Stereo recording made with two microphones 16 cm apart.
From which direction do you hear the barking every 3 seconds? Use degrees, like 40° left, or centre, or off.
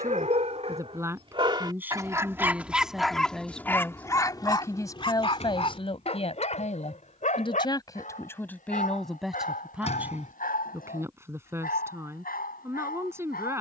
30° right, 20° left, 50° left, 60° left, 70° left.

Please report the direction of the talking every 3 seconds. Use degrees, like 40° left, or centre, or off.
10° right, 20° left, 30° left, 10° right, 20° right.